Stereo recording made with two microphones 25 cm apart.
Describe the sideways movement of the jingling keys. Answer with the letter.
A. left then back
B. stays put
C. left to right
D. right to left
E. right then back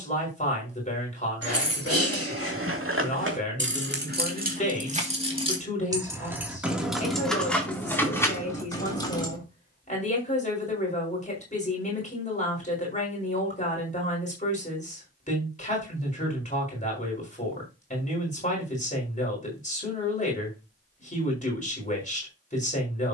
D.